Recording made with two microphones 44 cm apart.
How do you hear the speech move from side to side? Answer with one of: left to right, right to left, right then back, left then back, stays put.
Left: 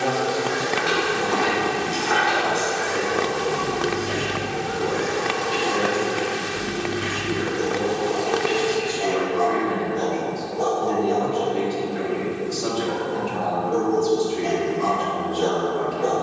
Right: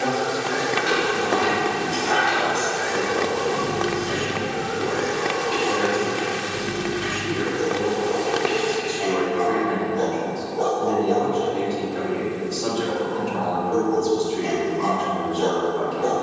stays put.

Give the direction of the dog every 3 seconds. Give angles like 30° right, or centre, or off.
20° right, 20° left, 70° left, 40° left, centre, 10° right.